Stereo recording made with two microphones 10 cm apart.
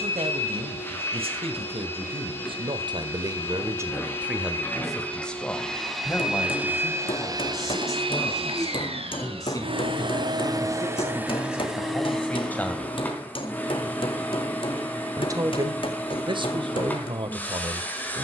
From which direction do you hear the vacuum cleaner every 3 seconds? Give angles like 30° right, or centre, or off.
20° left, 20° left, 40° right, 40° right, 10° left, 20° left.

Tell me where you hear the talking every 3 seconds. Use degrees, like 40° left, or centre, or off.
70° right, 10° right, 30° left, 30° left, 20° left, 50° right.